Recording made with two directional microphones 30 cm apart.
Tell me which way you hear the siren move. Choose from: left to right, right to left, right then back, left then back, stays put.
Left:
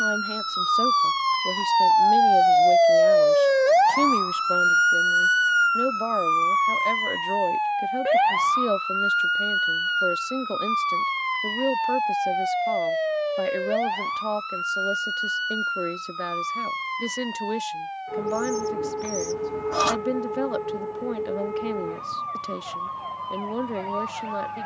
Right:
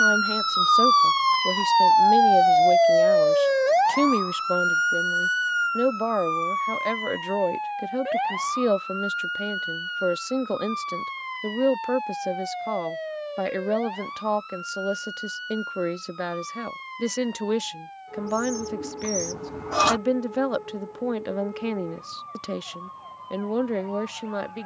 right to left.